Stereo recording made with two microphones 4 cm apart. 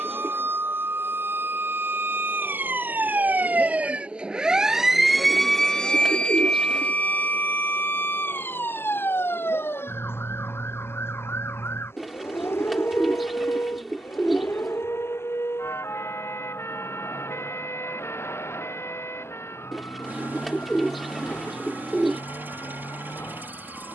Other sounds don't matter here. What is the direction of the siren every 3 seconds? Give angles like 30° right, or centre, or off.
60° right, 10° right, 50° left, 70° left, 80° left, 80° left, 80° left, 80° left.